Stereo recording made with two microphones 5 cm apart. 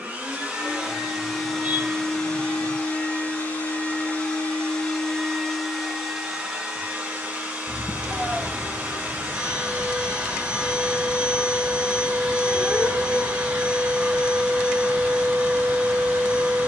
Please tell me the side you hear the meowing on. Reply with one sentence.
In this clip you hear the meowing on the right.